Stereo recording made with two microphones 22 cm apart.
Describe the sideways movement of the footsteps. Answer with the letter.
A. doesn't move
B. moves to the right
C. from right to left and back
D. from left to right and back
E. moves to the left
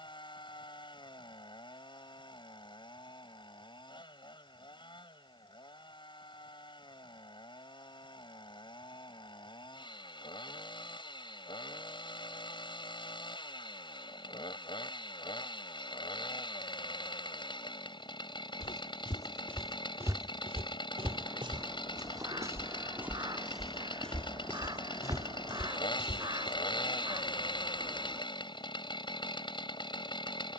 D.